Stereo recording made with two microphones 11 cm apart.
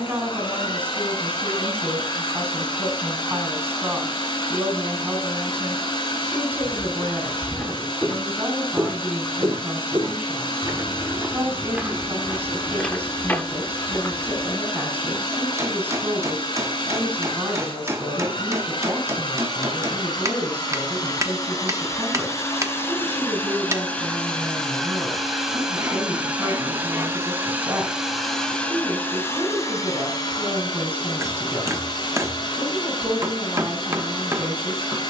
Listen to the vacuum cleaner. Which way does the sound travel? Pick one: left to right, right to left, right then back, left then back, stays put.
right then back.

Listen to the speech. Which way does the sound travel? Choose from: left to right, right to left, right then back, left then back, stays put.
stays put.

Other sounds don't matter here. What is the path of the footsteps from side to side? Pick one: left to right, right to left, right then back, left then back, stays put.
right then back.